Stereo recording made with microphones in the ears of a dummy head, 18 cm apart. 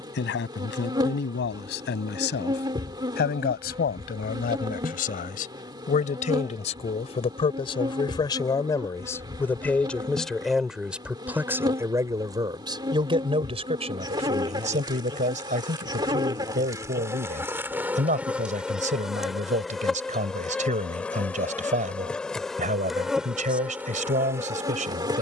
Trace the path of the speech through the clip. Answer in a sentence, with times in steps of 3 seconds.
In this clip you hear the speech on the left from 0 s, in the centre from 9 s and on the right from 12 s.